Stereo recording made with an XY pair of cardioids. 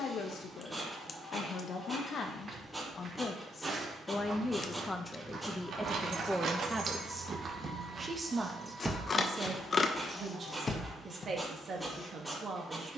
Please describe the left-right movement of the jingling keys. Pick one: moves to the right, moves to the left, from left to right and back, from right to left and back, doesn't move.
moves to the left.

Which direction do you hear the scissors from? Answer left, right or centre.
left.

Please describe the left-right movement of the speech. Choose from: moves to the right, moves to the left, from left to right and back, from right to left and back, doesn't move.
moves to the right.